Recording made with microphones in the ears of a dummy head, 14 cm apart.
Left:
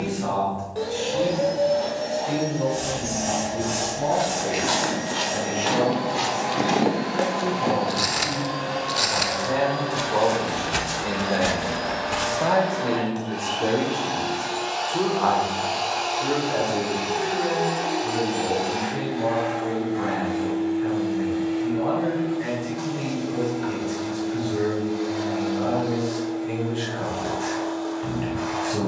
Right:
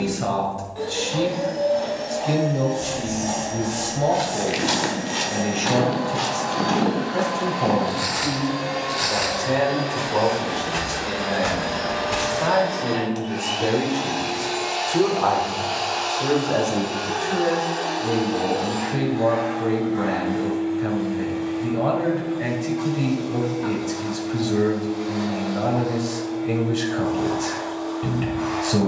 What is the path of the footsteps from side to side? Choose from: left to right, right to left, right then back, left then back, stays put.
left then back.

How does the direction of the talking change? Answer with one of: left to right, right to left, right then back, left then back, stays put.
left then back.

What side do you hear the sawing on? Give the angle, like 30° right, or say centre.
80° left.